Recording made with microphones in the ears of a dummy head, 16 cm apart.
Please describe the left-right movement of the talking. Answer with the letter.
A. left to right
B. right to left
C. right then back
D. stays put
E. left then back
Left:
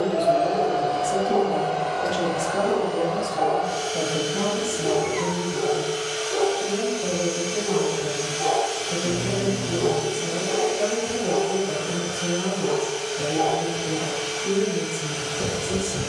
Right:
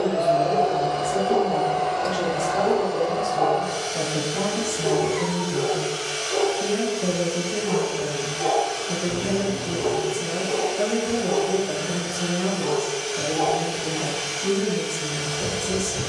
A.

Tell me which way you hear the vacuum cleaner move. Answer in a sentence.
In this clip you hear the vacuum cleaner move from right to left and back again.